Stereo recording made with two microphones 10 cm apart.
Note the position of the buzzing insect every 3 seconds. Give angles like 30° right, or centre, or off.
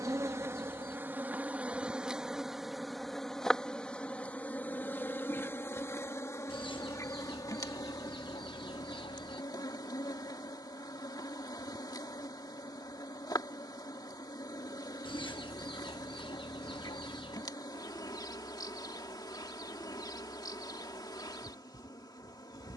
10° right, 20° left, 40° left, 40° left, 40° left, 40° left, 40° left, 40° left.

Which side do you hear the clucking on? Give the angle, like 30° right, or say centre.
60° left.